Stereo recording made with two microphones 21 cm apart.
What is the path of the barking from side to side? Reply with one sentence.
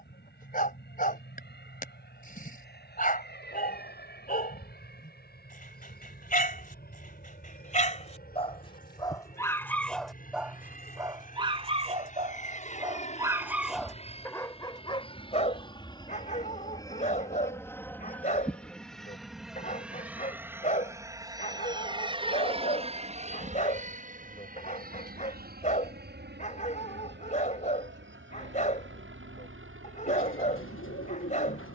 You can hear the barking go right and come back.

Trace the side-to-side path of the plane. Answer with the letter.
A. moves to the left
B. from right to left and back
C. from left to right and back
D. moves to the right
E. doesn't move
D.